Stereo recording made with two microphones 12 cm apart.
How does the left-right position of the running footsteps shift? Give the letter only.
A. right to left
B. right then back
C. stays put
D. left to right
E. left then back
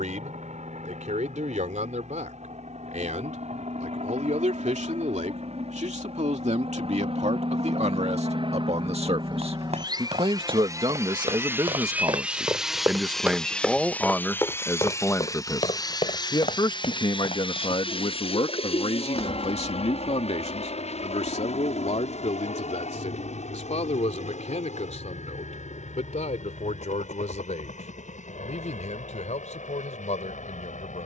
A.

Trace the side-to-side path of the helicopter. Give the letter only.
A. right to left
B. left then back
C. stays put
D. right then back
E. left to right
A.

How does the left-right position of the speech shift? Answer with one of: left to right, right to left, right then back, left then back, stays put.
right to left.